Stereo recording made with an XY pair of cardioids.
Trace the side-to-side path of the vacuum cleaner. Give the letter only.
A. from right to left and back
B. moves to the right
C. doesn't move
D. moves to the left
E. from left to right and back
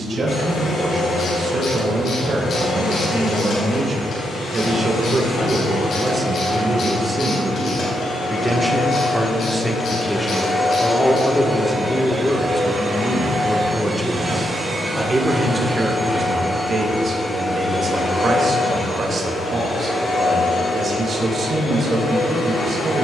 E.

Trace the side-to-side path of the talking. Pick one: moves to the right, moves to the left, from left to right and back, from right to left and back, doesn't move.
from right to left and back.